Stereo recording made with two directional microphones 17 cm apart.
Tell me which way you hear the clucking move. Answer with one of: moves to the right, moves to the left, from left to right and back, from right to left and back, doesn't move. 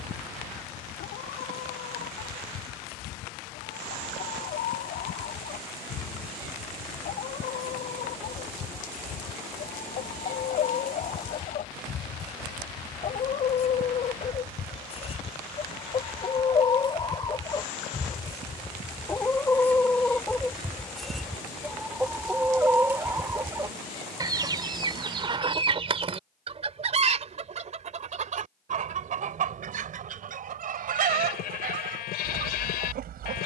moves to the right.